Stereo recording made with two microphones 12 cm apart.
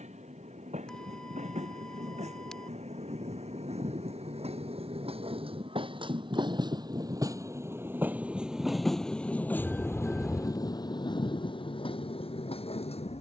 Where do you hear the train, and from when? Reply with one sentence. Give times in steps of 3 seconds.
You can hear the train on the right from 0 s and on the left from 9 s.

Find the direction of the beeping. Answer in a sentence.
In this clip you hear the beeping in the centre.